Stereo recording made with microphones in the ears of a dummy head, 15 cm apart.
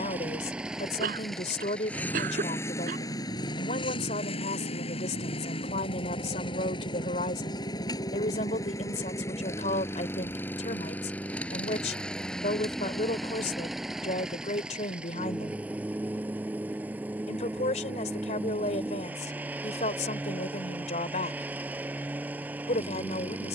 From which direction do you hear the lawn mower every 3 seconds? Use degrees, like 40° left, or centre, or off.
centre, 30° left, 30° left, 10° left, centre, 10° right, 10° right, 10° right.